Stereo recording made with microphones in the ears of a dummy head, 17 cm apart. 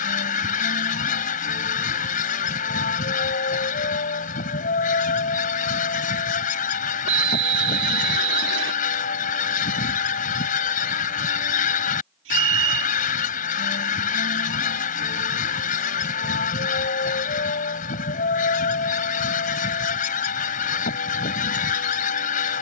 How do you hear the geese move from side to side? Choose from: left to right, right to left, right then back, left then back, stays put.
stays put.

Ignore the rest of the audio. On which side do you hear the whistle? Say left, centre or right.
right.